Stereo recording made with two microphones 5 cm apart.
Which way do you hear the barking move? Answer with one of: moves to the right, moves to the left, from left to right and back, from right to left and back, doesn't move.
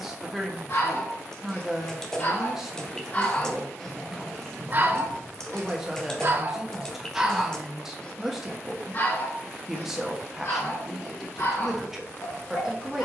from left to right and back.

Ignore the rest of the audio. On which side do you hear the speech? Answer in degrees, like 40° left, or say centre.
10° right.